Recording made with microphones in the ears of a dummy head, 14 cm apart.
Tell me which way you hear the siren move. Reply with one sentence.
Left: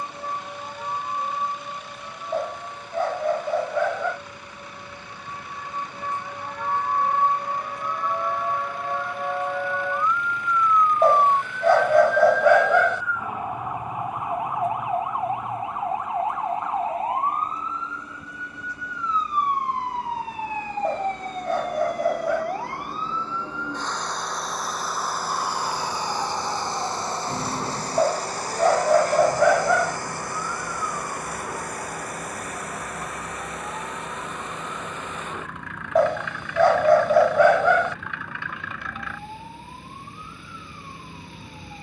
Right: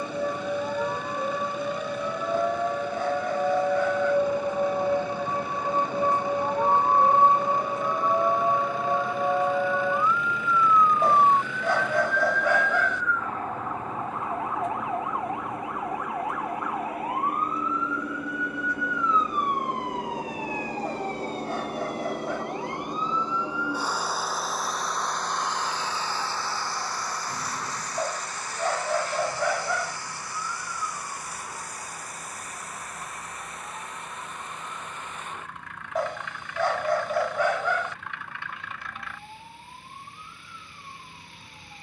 In this clip you hear the siren move from right to left.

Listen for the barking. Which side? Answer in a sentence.
In this clip you hear the barking on the left.